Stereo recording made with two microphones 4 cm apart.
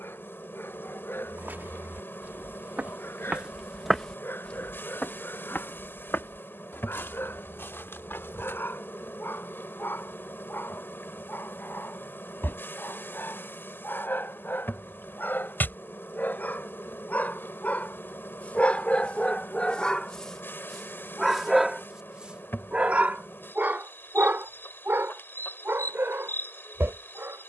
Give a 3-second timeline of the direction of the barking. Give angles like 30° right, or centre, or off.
70° left, 70° left, 60° left, 60° left, 60° left, 50° left, 30° left, 30° right, 70° right.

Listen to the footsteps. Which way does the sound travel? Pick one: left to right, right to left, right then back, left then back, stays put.
right to left.